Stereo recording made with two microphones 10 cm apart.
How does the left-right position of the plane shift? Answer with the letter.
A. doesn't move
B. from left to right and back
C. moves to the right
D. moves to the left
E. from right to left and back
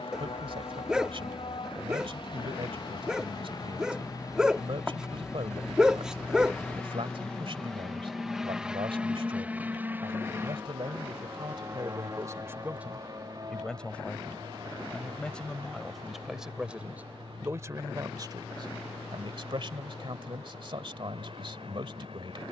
C.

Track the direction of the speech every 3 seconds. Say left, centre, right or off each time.
right, right, right, right, centre, centre, right, right.